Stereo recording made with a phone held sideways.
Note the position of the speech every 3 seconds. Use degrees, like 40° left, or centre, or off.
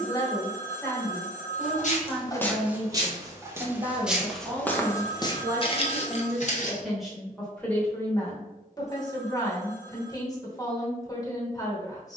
centre, 20° right, 10° left, 30° left.